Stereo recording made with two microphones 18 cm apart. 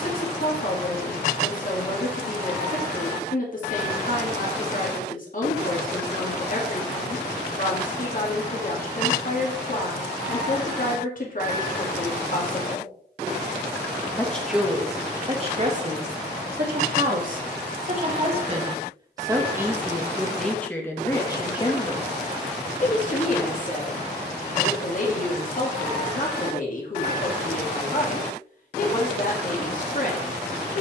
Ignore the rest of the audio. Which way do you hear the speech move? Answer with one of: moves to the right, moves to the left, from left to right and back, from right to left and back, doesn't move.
from left to right and back.